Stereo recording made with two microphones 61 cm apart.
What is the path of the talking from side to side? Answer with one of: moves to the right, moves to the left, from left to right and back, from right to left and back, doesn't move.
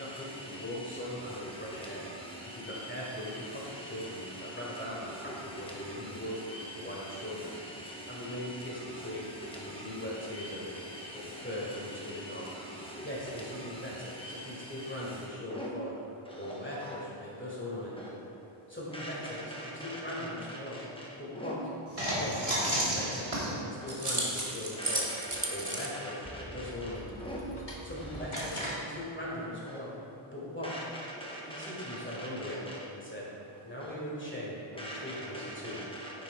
doesn't move.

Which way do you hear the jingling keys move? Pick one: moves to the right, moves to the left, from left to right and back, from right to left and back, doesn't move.
moves to the left.